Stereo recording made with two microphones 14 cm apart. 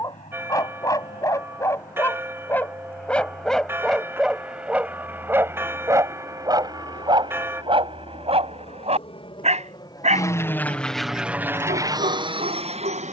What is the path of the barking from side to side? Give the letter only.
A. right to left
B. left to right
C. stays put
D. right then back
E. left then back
B.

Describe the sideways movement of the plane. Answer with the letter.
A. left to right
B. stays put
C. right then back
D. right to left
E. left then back
A.